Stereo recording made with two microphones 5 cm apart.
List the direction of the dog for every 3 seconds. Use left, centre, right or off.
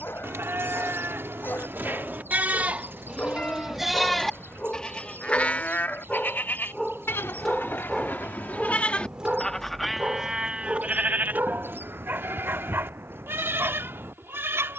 left, left, centre, right, right.